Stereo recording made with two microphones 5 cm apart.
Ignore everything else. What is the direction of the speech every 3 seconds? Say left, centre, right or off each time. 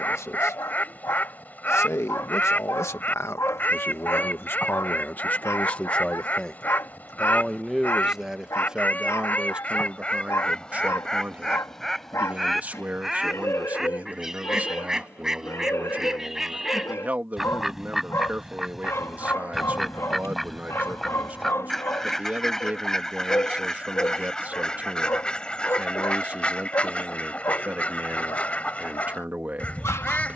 left, left, centre, right, right, right, right, right, right, right.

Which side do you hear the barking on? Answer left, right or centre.
left.